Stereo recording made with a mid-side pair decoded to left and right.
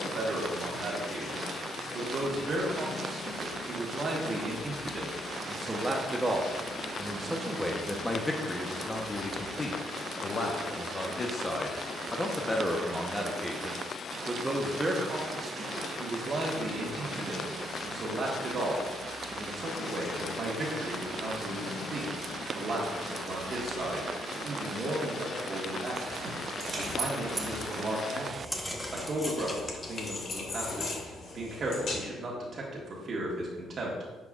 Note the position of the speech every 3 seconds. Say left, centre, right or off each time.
right, right, centre, left, centre, right, right, right, right, right, right, right.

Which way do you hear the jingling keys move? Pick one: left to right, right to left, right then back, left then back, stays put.
right to left.